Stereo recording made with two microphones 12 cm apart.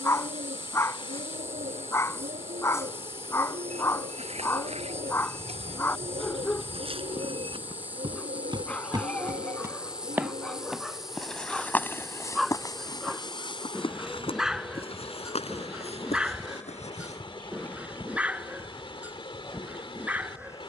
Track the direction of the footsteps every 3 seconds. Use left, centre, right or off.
off, right, right, centre, left, left, off.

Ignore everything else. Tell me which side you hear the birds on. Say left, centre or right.
right.